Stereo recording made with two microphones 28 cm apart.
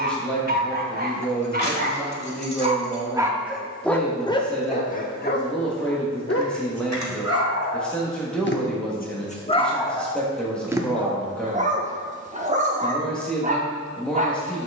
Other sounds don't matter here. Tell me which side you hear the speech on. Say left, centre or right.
centre.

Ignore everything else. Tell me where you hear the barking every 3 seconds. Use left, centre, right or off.
right, left, left, centre, right.